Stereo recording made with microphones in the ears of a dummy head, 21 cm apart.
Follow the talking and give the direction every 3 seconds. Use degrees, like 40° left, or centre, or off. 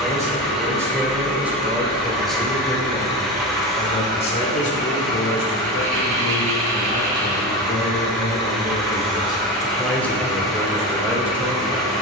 10° right, 30° left, 40° left, centre.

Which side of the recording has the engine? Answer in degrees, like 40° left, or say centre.
centre.